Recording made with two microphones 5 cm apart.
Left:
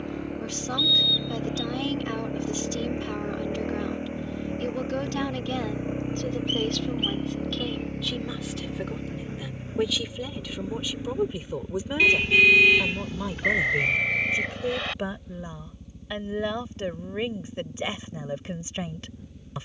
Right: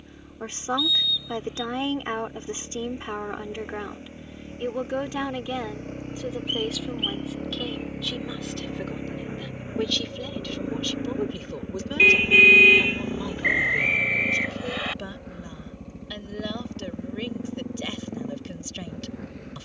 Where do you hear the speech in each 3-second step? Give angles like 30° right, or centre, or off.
30° right, 20° right, centre, 10° left, 20° left, 20° left, 20° left.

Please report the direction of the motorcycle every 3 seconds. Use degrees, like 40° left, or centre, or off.
50° left, 30° left, centre, 30° right, 40° right, 60° right, 60° right.